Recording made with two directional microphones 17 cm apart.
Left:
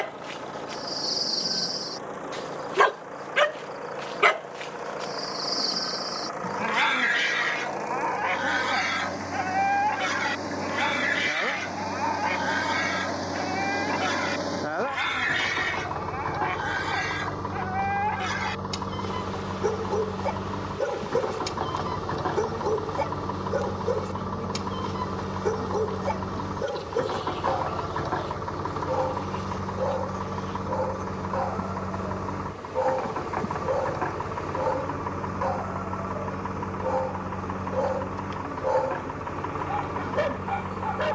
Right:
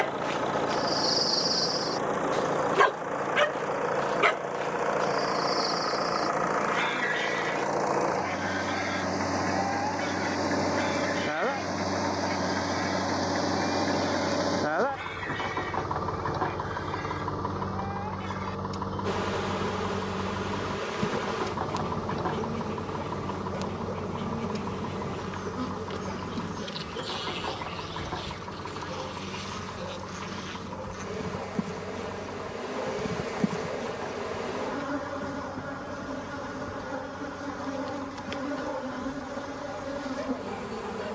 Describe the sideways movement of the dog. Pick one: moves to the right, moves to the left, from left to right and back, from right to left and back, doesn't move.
moves to the left.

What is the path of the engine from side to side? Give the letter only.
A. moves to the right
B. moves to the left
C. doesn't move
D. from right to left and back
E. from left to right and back
B.